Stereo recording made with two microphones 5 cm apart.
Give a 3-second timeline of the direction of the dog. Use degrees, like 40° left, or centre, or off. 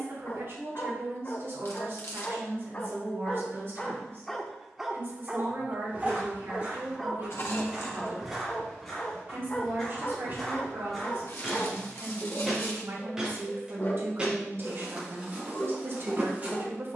40° left, centre, centre, 40° left, 40° left, 40° left.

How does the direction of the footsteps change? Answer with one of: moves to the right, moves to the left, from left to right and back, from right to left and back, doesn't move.
from right to left and back.